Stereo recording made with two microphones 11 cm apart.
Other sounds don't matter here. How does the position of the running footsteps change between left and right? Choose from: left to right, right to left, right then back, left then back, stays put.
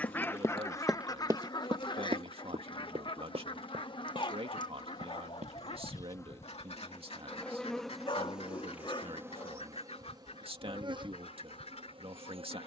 left to right.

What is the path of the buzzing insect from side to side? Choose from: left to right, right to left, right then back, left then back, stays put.
left to right.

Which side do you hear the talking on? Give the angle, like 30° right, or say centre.
60° right.